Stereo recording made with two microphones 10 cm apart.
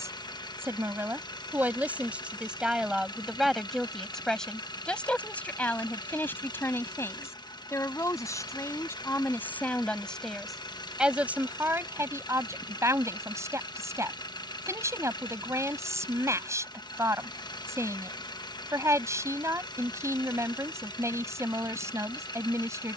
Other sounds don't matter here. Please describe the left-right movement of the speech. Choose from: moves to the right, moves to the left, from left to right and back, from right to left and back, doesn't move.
from right to left and back.